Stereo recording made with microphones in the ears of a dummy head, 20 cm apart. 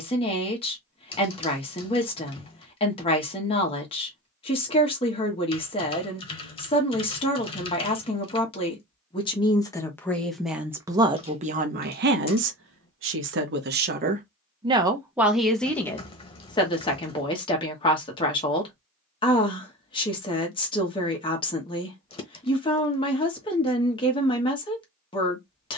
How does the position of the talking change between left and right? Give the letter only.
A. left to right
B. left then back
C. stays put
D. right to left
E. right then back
E.